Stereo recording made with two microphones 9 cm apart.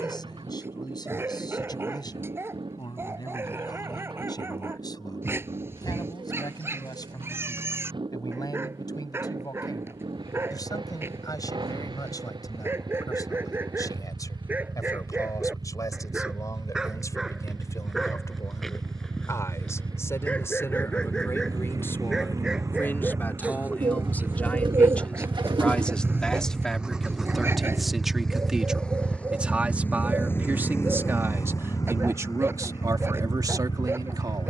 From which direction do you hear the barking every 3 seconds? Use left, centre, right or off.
right, right, right, right, right, centre, centre, centre, right, right, right, right.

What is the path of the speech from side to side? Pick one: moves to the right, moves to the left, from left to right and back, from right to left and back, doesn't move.
moves to the right.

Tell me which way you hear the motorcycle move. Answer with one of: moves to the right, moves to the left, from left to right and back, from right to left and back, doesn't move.
moves to the left.